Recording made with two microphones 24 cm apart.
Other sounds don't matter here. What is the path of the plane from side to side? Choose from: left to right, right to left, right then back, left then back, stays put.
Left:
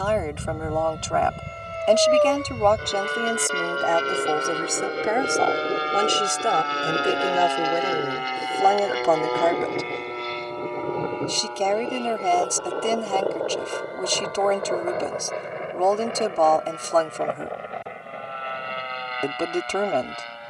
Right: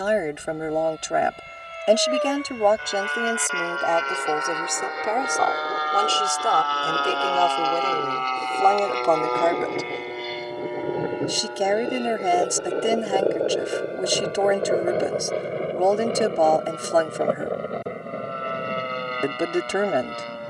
left to right.